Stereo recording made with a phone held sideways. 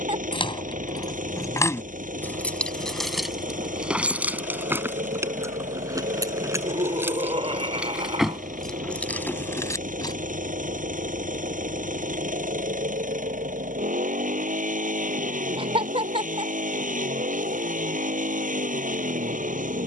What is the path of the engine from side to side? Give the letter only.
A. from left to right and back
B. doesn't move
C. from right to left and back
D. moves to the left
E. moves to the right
B.